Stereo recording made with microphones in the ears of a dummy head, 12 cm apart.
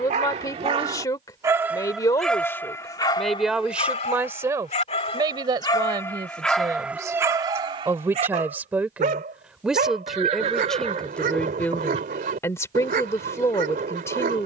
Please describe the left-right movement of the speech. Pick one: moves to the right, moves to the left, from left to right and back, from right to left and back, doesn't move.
from left to right and back.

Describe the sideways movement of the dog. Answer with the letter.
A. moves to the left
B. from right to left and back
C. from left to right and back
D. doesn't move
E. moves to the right
B.